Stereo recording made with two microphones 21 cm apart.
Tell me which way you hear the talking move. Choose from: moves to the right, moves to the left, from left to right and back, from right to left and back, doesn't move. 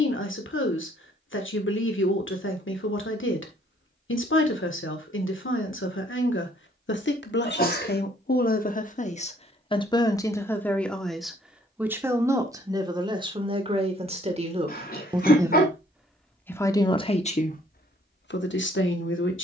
from left to right and back.